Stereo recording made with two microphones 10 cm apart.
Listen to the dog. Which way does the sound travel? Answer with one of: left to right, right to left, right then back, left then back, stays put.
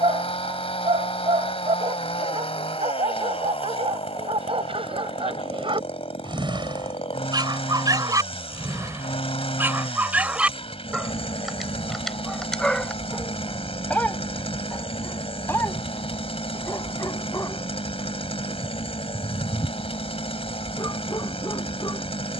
right to left.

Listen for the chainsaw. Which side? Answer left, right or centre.
left.